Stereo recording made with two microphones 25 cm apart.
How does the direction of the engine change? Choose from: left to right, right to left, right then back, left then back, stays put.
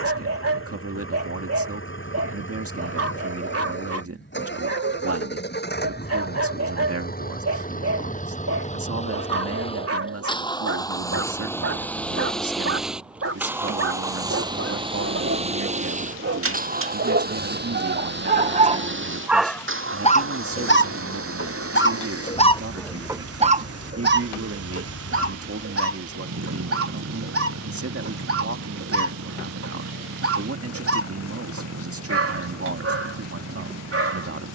left to right.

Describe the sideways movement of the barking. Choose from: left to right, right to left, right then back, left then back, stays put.
left then back.